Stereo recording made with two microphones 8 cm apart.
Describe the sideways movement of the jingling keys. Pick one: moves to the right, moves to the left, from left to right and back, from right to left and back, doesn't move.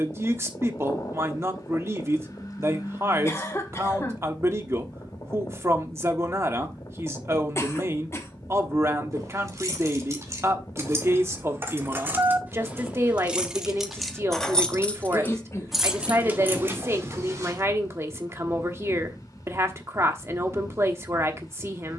from right to left and back.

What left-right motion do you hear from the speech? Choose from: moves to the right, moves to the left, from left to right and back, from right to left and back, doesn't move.
doesn't move.